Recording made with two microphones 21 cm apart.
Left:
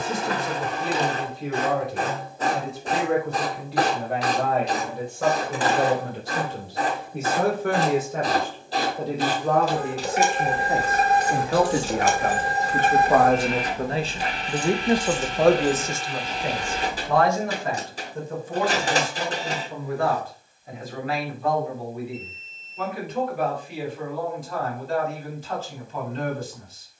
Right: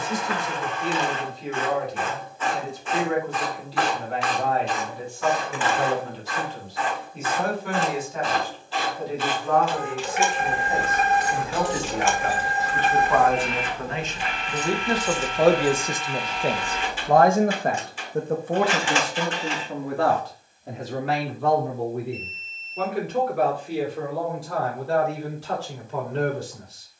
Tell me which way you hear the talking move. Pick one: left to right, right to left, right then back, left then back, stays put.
left to right.